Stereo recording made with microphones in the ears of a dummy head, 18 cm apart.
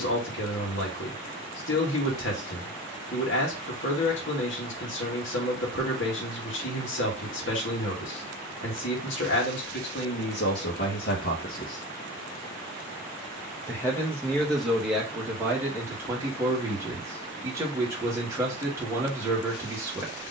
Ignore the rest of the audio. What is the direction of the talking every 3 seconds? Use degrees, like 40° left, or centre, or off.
60° left, 60° left, 60° left, 50° left, 10° left, 10° right, 10° right.